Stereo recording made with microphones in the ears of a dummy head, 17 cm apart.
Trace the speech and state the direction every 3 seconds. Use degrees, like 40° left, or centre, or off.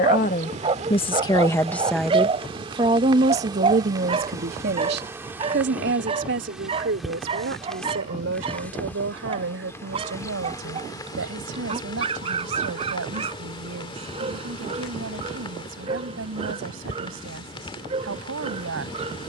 20° left, 50° right, 70° right, 80° right, 80° right, 80° right, 80° right.